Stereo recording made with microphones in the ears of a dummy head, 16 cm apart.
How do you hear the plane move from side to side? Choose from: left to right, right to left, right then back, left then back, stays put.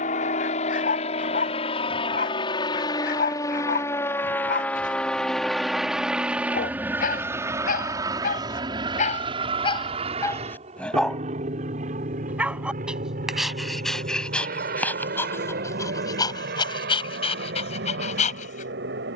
left to right.